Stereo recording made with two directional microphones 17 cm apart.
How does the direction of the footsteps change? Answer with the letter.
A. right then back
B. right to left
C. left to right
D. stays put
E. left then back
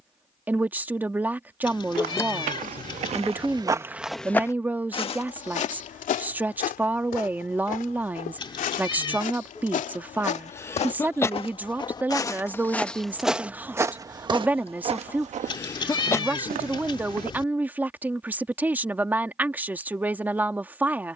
E.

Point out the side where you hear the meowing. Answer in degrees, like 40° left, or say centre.
30° left.